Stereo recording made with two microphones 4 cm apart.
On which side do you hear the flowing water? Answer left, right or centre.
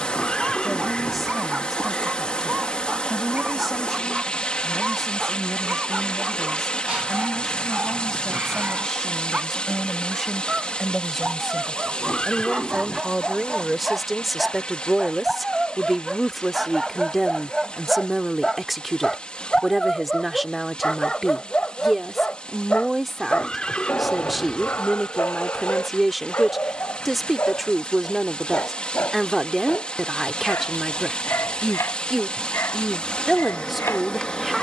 left.